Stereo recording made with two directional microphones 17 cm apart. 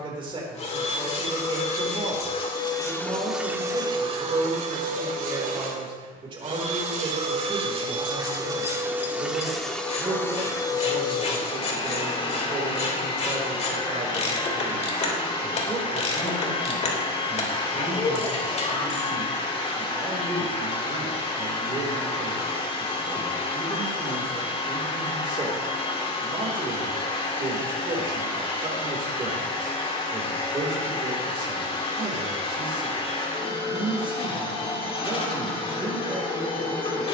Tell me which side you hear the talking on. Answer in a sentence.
You can hear the talking on the right.